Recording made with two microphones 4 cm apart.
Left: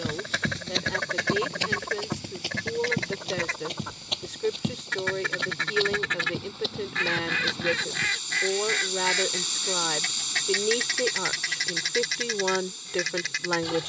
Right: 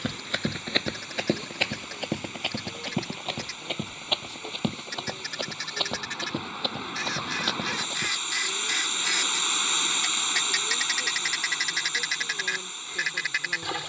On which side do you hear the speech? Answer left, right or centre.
left.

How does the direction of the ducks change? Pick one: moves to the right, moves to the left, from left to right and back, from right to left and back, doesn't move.
moves to the right.